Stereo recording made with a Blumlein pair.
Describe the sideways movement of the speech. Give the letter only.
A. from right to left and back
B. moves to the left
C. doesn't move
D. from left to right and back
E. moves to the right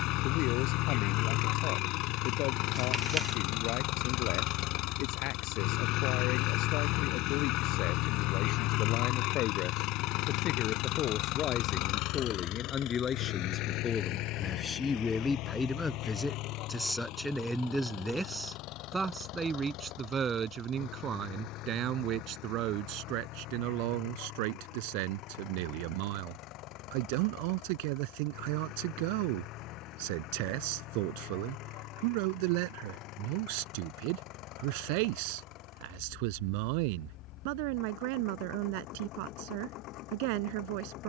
E.